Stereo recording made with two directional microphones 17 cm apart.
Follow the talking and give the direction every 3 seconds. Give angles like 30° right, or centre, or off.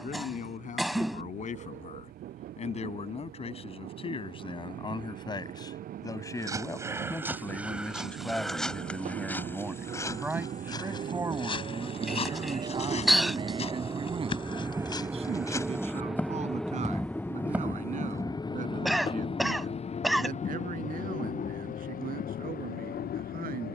50° left, 30° left, 10° left, 10° right, 30° right, 40° right, 50° right, 60° right.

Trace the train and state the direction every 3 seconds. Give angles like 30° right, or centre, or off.
70° right, 60° right, 60° right, 50° right, 30° right, centre, 30° left, 50° left.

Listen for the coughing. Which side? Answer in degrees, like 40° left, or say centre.
centre.